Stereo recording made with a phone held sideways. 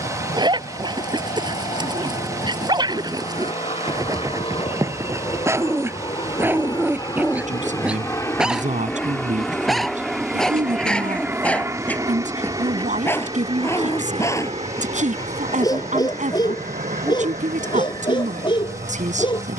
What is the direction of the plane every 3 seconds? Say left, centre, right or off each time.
left, left, left, centre, right, right, right.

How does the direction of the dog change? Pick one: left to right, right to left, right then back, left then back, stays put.
right to left.